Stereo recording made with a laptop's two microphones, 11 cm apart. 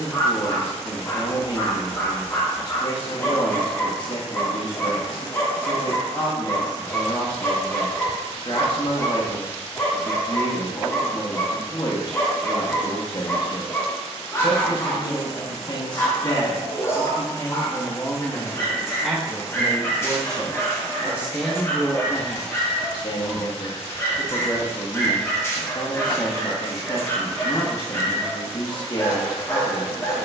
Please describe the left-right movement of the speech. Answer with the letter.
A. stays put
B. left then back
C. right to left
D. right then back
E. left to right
D.